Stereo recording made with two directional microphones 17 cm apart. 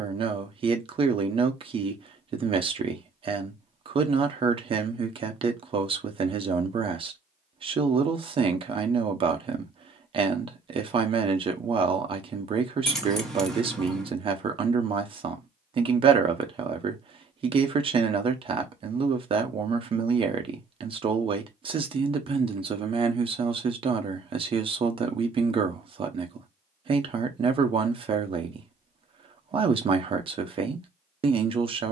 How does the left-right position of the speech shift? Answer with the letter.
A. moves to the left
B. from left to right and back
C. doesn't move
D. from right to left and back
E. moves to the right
C.